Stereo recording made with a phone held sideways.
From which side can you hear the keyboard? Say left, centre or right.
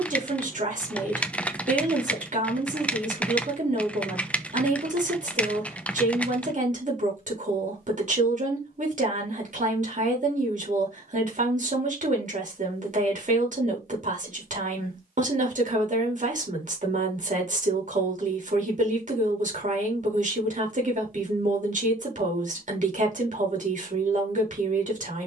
centre.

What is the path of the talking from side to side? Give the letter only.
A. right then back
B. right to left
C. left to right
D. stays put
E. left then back
D.